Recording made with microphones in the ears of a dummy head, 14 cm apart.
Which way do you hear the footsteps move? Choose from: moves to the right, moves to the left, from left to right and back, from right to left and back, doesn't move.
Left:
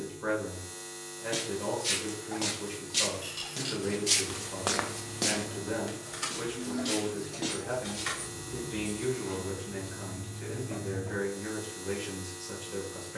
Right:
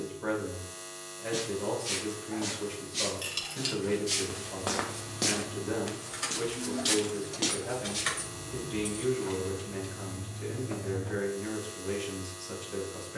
moves to the right.